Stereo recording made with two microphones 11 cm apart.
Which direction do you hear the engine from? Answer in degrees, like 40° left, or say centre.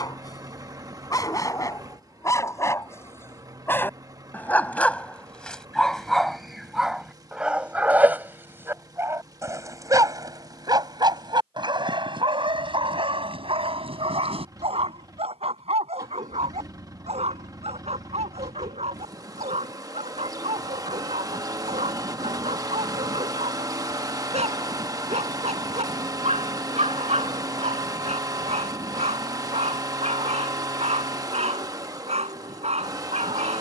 30° right.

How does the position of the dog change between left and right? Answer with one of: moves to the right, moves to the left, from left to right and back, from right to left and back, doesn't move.
moves to the right.